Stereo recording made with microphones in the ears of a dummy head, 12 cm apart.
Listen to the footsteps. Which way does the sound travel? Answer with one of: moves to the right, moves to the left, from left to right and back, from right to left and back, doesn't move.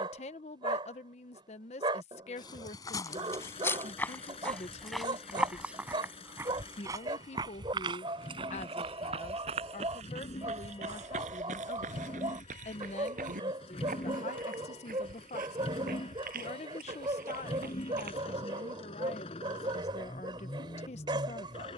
moves to the right.